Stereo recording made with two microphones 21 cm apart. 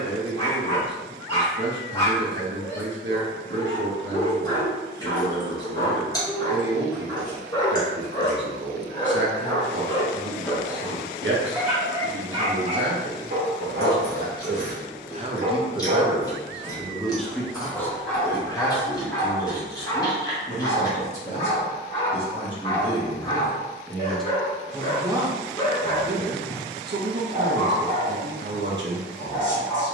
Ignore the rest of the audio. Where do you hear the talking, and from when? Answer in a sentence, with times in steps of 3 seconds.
You can hear the talking on the right from 0 s, in the centre from 15 s, on the left from 18 s and on the right from 24 s.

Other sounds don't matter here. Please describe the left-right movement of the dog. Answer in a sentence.
In this clip you hear the dog move from left to right and back again.